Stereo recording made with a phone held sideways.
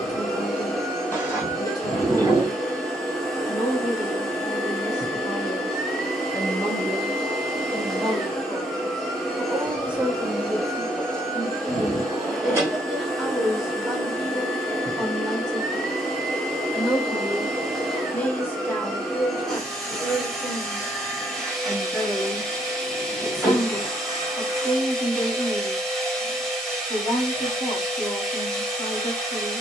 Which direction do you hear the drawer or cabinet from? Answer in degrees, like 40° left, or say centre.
20° left.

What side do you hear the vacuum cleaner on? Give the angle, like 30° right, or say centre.
centre.